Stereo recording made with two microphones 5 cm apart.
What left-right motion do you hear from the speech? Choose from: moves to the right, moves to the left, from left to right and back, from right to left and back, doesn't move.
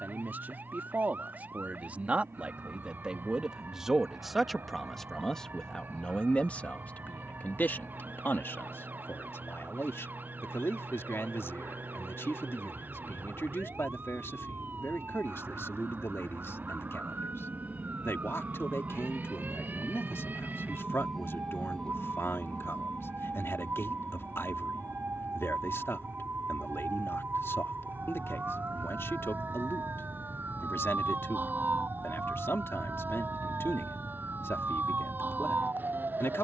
moves to the left.